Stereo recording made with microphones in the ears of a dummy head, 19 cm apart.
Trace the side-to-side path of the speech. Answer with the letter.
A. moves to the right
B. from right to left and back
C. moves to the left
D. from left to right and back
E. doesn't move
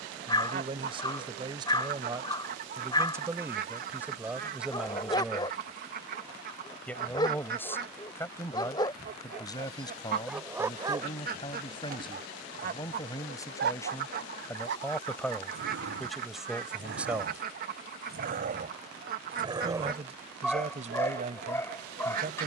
B.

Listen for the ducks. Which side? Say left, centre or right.
right.